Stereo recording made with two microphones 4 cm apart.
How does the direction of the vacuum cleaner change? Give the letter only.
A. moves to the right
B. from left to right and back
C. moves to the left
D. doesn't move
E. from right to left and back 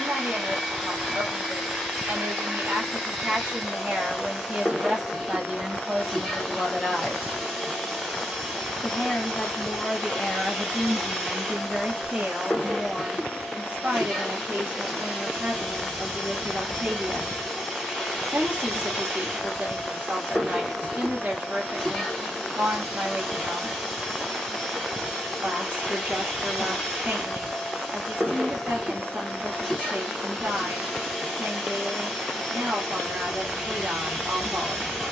D.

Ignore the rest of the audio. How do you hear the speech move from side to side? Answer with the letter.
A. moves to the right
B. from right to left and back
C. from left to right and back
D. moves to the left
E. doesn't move
B.